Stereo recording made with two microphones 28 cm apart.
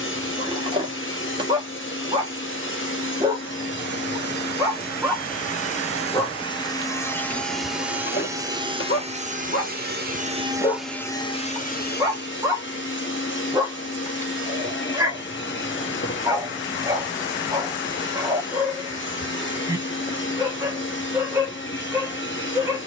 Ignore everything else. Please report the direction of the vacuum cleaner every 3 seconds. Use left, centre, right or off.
left, left, centre, centre, left, left, left, left.